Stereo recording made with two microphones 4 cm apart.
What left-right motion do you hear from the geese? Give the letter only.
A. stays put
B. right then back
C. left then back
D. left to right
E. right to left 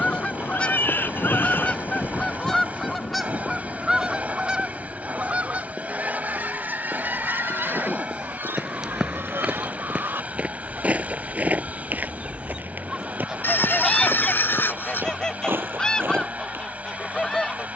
B.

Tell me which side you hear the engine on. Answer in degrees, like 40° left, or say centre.
30° right.